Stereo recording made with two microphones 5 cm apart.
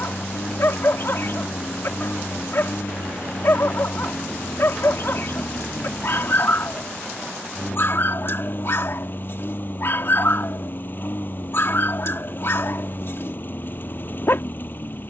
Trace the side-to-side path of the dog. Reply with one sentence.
In this clip you hear the dog stay in one place.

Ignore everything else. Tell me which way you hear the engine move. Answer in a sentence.
You can hear the engine stay in one place.